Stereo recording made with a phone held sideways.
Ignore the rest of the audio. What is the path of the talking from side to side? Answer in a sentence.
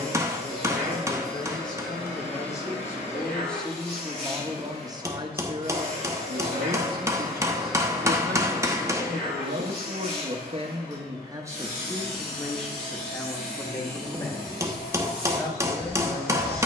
You can hear the talking go right and come back.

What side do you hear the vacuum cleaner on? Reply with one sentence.
In this clip you hear the vacuum cleaner on the left.